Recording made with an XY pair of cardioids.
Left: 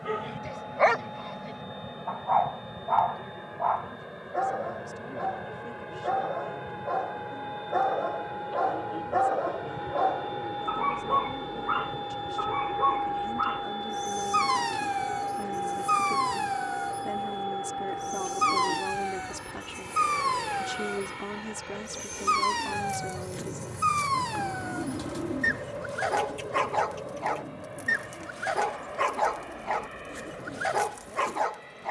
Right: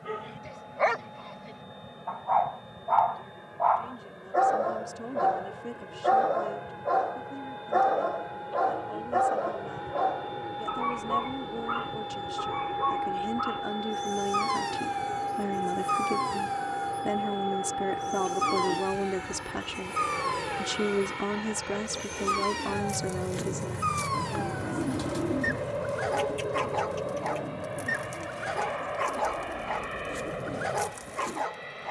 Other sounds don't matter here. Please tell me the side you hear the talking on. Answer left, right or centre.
right.